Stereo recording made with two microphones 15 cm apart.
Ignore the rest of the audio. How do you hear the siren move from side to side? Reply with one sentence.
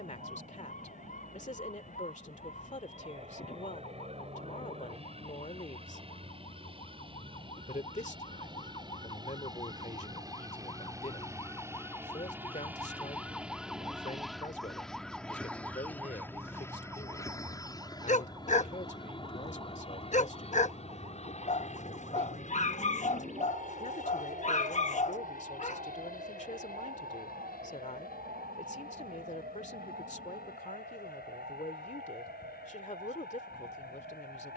You can hear the siren go from the left side to the right.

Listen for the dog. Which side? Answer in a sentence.
In this clip you hear the dog on the left.